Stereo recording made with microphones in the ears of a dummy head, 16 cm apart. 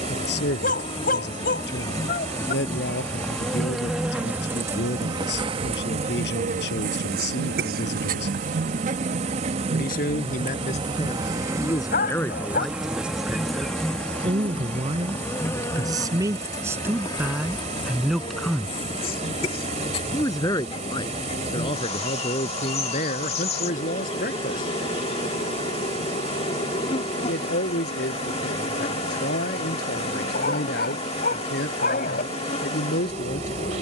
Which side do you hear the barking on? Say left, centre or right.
left.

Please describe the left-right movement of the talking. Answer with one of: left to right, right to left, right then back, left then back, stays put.
right then back.